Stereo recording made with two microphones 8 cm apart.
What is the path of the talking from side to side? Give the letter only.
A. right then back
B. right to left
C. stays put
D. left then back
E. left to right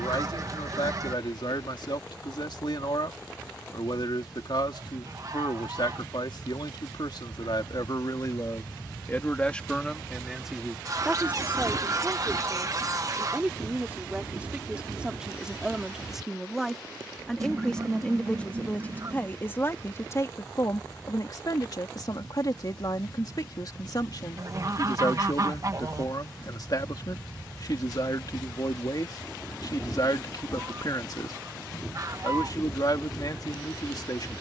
A.